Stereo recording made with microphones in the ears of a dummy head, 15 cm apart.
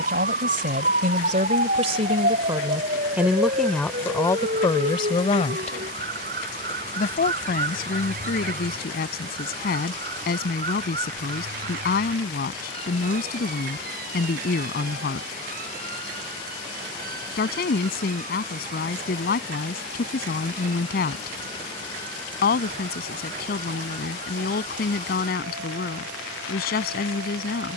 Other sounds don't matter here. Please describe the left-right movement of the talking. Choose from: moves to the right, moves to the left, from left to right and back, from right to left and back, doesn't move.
moves to the left.